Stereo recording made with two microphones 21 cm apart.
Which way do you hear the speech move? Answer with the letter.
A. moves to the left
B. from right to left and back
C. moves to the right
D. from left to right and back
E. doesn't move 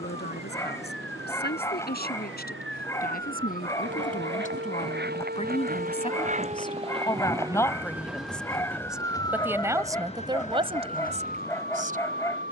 C.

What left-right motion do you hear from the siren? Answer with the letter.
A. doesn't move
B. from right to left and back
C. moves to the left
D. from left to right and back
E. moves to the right
C.